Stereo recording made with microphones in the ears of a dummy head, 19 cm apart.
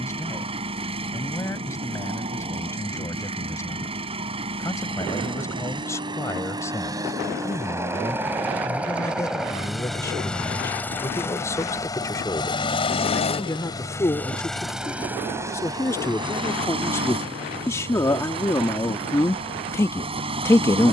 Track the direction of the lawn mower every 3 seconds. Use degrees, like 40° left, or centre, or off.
30° right, 30° right, 20° right, 10° left, 20° left, 20° right, 30° right.